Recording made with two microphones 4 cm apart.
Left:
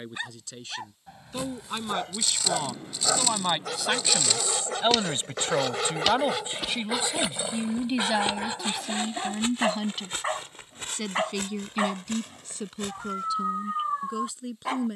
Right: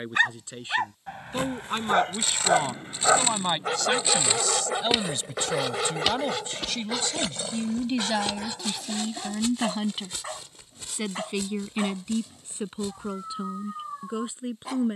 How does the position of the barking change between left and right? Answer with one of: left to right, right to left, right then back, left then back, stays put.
right to left.